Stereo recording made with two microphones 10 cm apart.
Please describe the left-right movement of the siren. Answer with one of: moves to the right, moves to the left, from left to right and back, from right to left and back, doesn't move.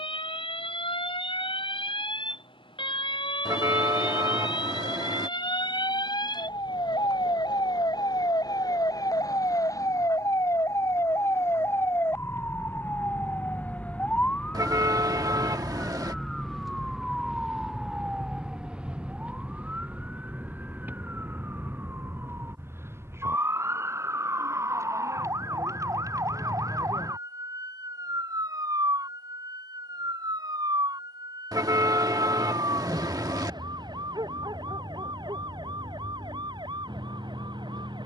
moves to the right.